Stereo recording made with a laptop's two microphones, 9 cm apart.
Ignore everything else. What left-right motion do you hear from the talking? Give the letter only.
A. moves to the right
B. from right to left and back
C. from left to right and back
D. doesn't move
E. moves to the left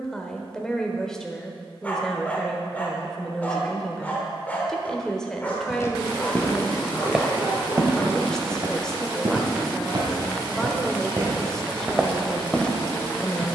D.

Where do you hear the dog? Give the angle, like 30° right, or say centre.
20° left.